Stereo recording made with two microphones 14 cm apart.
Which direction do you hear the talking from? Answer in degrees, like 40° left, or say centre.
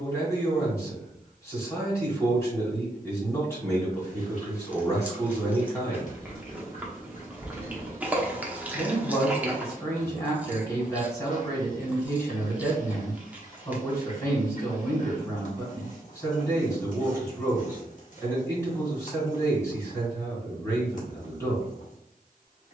20° left.